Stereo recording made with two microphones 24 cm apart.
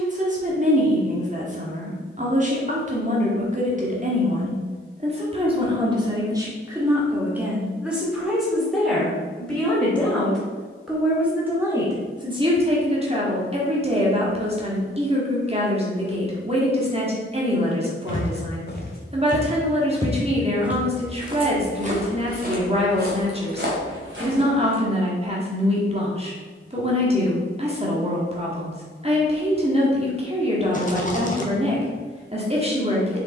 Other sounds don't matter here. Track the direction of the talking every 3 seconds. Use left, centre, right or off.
right, right, centre, centre, right, right, right, right, right, right, right.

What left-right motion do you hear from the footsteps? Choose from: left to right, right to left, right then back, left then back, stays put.
left to right.